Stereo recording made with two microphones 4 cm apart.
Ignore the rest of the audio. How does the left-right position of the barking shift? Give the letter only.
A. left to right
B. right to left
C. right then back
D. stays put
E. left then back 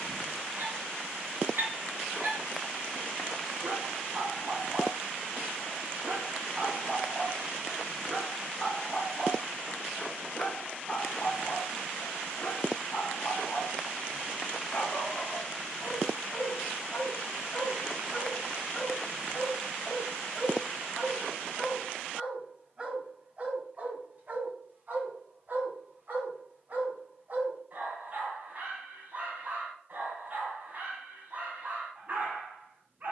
E.